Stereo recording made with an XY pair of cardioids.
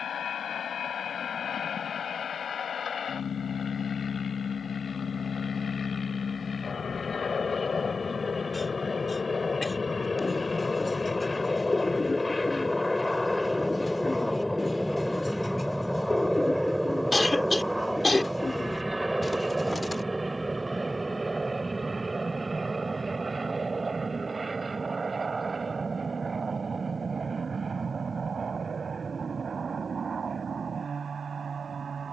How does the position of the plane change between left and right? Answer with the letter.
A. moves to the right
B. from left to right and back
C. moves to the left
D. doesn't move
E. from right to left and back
A.